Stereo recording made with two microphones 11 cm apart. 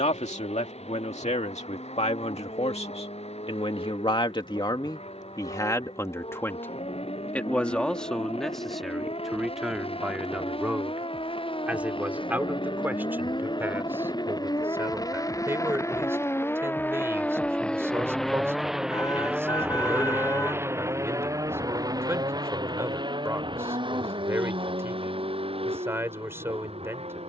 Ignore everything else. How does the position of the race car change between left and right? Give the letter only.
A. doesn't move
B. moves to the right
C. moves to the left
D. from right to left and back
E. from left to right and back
B.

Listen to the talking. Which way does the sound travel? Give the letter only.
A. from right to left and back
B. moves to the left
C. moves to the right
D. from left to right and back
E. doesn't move
C.